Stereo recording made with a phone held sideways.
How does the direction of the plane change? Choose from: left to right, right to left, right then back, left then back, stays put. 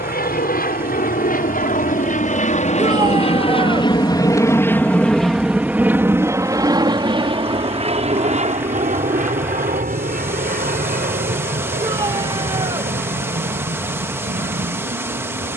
left to right.